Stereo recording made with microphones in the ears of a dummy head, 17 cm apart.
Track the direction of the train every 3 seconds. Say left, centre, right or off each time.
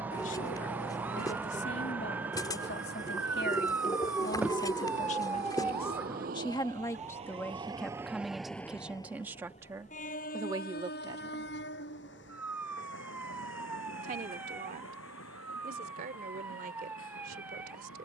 right, right, right, left, left, left.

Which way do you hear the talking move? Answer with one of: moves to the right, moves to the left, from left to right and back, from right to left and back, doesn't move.
moves to the right.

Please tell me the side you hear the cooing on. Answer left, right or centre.
left.